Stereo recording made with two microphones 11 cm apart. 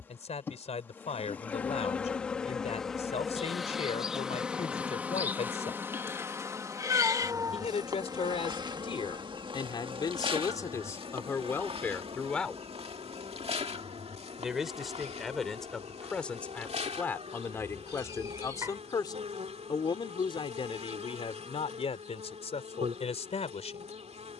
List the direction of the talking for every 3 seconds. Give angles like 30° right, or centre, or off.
80° left, 80° left, 60° left, 30° left, centre, 10° left, 40° left, 70° left.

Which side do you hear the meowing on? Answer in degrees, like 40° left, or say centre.
30° right.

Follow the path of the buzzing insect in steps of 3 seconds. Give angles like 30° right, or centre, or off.
10° left, 10° right, 30° right, 50° right, 70° right, 80° right, 80° right, 80° right.